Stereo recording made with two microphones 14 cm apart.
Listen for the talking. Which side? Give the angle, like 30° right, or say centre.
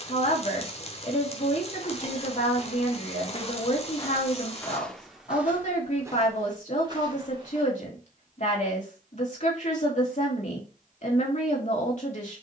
60° left.